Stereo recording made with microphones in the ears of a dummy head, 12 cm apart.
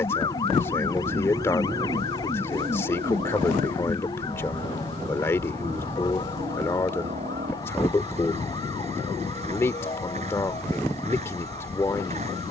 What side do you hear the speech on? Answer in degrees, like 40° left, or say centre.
20° left.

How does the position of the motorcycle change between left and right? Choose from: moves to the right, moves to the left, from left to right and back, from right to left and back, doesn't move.
doesn't move.